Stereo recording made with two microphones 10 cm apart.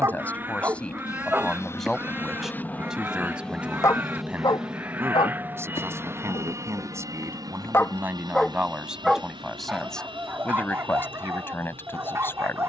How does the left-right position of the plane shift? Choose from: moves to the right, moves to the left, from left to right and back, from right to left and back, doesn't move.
moves to the right.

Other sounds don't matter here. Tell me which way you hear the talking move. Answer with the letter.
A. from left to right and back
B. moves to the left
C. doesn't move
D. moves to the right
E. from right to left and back
A.